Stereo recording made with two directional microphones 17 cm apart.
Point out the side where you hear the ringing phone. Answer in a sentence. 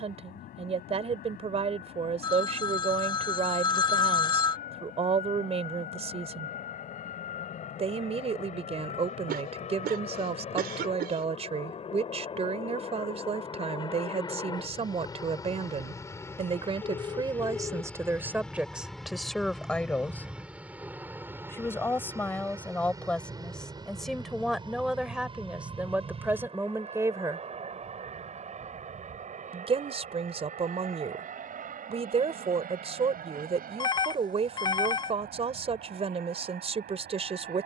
You can hear the ringing phone on the left.